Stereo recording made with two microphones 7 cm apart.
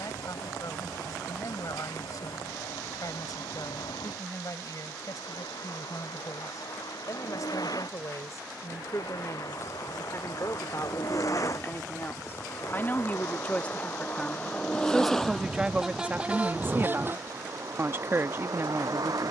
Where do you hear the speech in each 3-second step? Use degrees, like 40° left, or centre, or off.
50° left, 50° left, 50° left, 40° left, 20° left, 20° right, 30° right.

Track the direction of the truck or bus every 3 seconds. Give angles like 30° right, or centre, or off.
70° left, 70° left, 60° left, 50° left, 30° left, 20° right, 50° right.